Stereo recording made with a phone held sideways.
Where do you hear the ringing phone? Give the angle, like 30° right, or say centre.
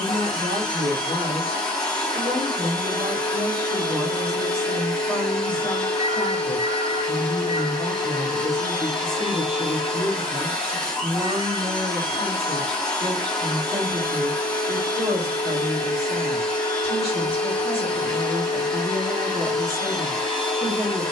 30° right.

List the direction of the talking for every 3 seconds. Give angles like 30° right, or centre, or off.
40° right, 20° right, 20° left, 20° right, 40° right, 40° right, 40° right.